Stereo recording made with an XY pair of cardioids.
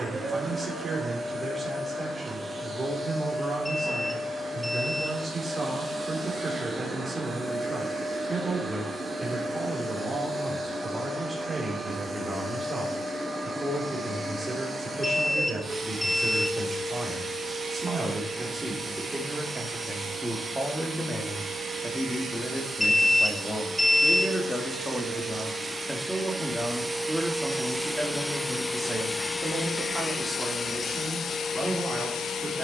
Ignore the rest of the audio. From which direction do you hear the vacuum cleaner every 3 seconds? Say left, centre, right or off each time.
right, right, right, right, right, right, right, right, right, centre, left.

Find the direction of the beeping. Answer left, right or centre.
centre.